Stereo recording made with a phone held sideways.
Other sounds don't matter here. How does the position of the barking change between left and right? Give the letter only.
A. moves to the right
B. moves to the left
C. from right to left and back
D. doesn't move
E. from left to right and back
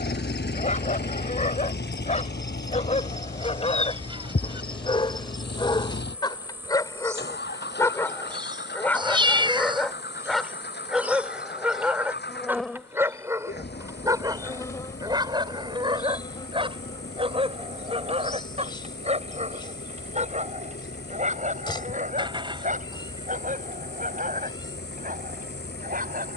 A.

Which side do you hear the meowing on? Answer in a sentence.
In this clip you hear the meowing on the right.